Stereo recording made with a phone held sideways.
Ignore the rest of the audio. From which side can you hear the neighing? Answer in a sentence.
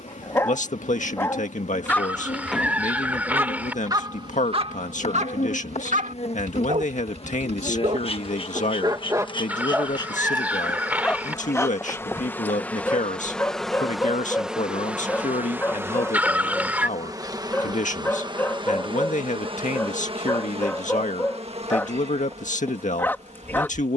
You can hear the neighing in the centre.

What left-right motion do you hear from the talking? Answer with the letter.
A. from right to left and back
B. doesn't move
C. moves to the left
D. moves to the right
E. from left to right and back
B.